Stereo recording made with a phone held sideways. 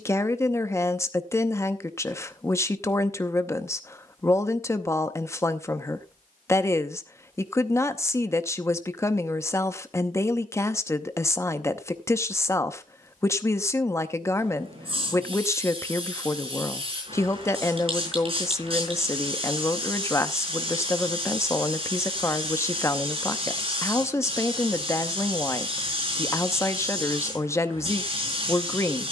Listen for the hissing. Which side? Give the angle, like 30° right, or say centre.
40° right.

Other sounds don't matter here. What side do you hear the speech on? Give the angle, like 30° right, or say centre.
20° left.